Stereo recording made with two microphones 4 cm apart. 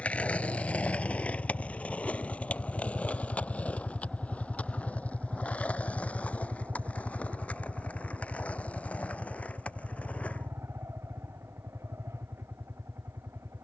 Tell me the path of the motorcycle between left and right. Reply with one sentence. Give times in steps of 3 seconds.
You can hear the motorcycle on the left from 0 s, in the centre from 3 s and on the right from 6 s.